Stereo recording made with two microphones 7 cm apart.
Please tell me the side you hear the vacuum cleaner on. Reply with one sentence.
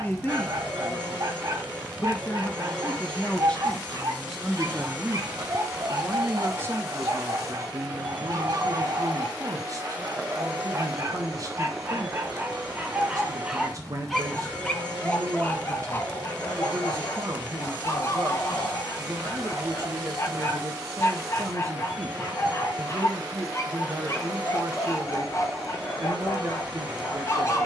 In this clip you hear the vacuum cleaner on the right.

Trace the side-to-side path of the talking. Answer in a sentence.
You can hear the talking move from left to right.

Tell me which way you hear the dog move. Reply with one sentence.
In this clip you hear the dog travel towards the left.